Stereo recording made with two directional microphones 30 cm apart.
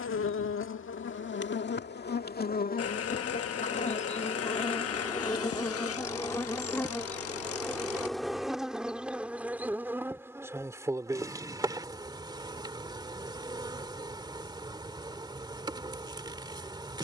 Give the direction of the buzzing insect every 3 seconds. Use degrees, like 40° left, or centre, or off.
40° left, 20° left, centre, 10° right, 10° right, 10° right.